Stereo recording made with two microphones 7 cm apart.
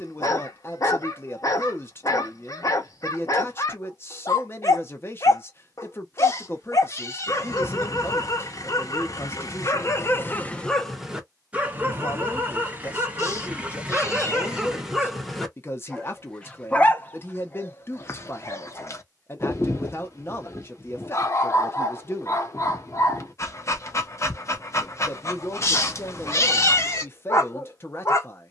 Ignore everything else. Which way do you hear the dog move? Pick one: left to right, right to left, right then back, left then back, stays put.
right then back.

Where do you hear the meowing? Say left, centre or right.
left.